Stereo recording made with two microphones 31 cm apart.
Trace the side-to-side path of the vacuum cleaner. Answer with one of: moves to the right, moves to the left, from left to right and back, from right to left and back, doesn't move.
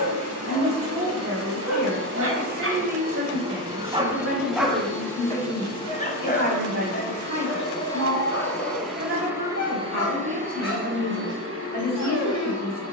from right to left and back.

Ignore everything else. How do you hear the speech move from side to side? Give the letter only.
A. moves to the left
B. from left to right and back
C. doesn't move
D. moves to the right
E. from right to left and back
C.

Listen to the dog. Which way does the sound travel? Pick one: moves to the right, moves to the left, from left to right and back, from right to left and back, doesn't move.
moves to the left.